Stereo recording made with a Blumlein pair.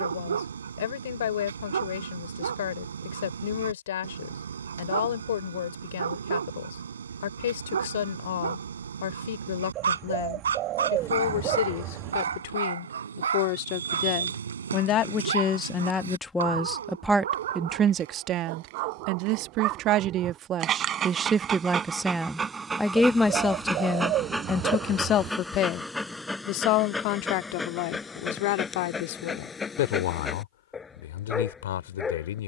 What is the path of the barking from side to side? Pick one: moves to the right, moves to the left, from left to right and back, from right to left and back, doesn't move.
moves to the left.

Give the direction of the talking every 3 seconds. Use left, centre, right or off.
left, left, left, left, left, centre, right, centre, left, left, left.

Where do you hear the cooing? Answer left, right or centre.
right.